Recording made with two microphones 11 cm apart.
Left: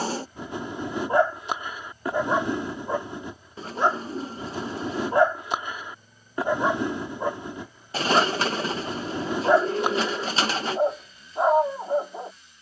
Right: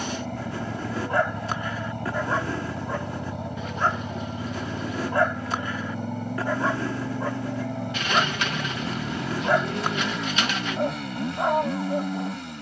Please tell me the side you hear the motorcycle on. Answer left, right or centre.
right.